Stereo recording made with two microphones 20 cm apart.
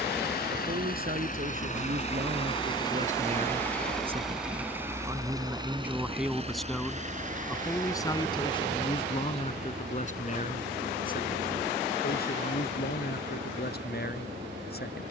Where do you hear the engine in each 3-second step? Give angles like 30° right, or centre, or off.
40° left, 10° right, 40° right, 60° right, 60° right.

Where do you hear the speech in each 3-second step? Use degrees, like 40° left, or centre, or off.
50° right, 20° right, 10° left, 40° left, 50° left.